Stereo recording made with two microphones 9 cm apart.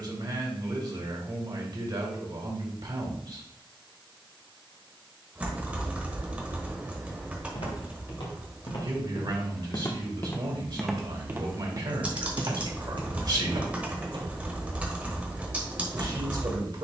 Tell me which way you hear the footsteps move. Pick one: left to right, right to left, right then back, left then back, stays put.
left to right.